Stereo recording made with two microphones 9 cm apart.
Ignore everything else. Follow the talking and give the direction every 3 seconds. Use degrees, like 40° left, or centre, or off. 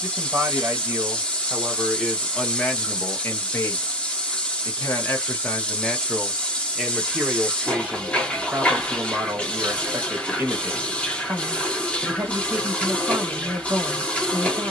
10° right, 20° left, 10° right, 20° right, 20° right.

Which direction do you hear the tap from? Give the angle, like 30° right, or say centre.
10° left.